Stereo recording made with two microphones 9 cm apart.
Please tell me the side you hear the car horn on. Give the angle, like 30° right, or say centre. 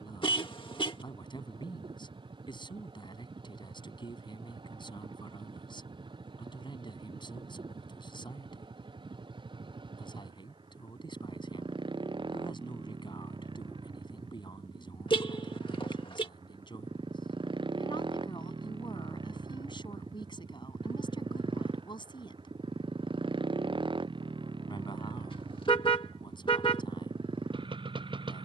80° left.